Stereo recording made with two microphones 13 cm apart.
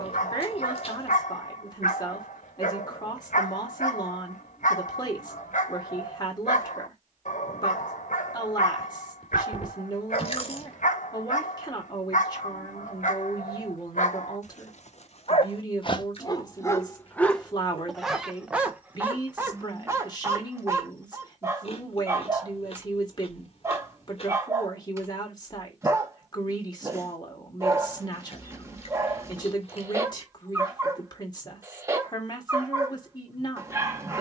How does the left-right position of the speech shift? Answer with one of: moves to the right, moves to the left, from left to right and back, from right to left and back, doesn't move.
doesn't move.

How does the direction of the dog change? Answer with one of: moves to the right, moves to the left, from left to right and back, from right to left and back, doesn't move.
moves to the right.